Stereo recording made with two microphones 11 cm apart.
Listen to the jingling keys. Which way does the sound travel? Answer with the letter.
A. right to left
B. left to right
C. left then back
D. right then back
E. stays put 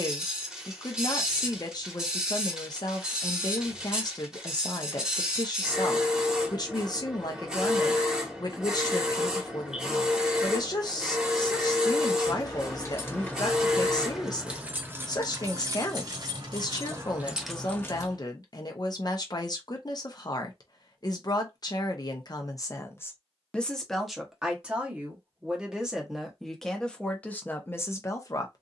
D.